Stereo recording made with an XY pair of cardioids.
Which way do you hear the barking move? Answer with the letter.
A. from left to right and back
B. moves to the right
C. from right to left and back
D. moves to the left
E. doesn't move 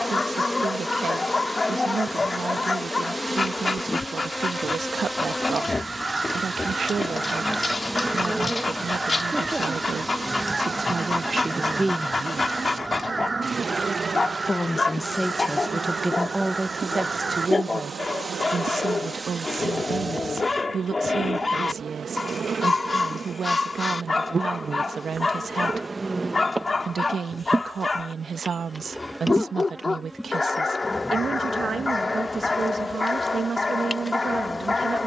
E.